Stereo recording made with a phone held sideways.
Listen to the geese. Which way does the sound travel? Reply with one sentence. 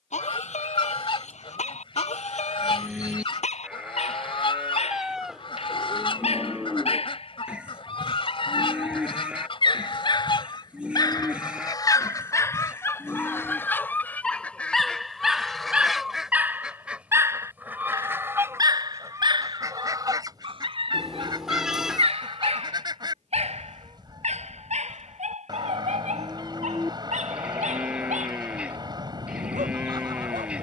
You can hear the geese go from the left side to the right.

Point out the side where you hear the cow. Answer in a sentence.
You can hear the cow in the centre.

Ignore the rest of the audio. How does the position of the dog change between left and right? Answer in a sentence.
In this clip you hear the dog go from the left side to the right.